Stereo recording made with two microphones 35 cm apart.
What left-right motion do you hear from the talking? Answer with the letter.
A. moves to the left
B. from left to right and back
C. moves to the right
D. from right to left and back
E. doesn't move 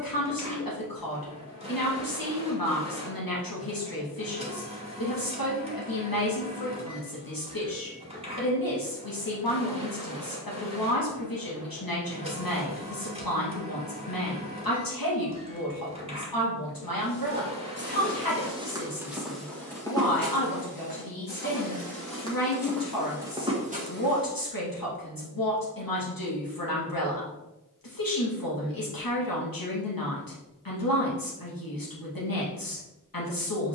E.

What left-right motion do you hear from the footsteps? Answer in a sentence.
You can hear the footsteps go left and come back.